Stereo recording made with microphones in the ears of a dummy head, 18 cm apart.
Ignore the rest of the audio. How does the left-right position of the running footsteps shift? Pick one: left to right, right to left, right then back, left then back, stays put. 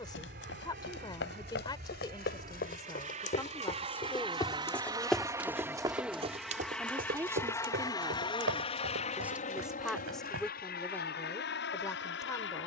left to right.